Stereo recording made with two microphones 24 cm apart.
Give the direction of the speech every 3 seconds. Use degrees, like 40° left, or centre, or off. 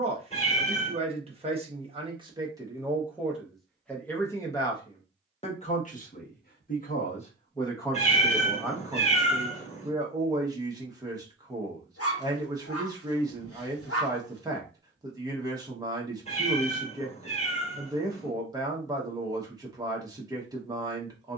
20° right, 10° left, 10° left, 20° right, 20° right, 20° right, 20° right.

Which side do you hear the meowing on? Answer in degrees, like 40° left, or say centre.
30° left.